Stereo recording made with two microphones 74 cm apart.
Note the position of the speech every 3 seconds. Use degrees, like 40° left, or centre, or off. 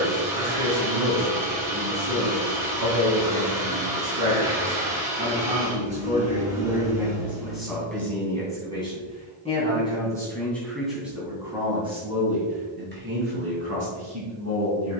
20° right, 20° right, centre, centre, 20° right.